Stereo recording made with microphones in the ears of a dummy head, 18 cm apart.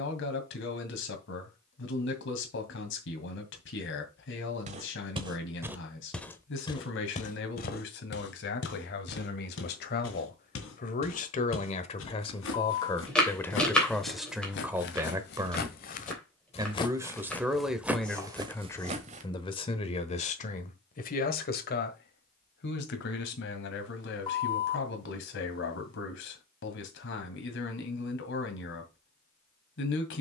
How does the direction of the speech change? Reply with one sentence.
In this clip you hear the speech move from left to right and back again.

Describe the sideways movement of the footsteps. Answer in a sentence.
In this clip you hear the footsteps go left and come back.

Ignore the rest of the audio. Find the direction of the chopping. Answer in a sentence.
You can hear the chopping in the centre.